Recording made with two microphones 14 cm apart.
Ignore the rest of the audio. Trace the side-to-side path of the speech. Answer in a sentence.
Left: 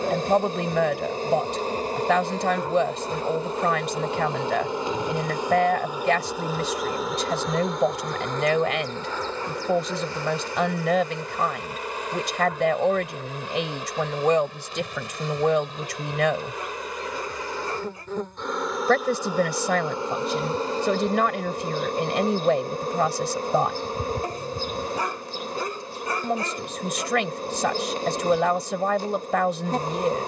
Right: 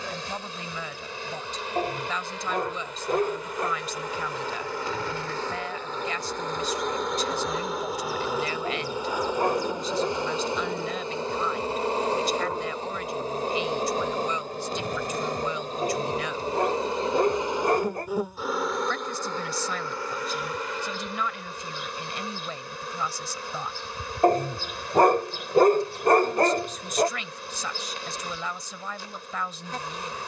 In this clip you hear the speech stay put.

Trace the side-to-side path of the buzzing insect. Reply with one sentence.
You can hear the buzzing insect go right and come back.